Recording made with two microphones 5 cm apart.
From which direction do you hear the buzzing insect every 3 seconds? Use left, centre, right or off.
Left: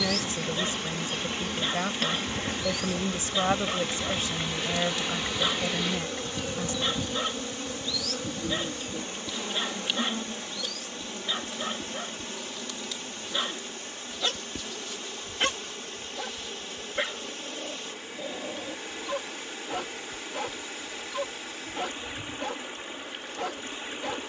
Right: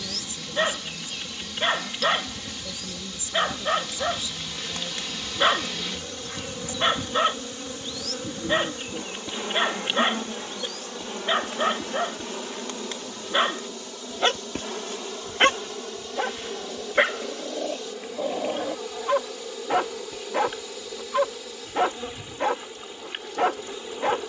left, left, centre, right, right, right, right, right.